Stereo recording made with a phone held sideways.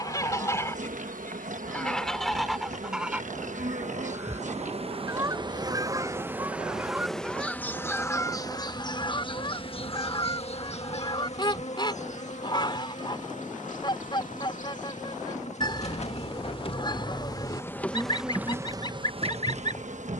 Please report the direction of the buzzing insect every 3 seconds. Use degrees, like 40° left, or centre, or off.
60° right, 50° right, 10° left, 40° left, 50° left, 40° left, 30° right.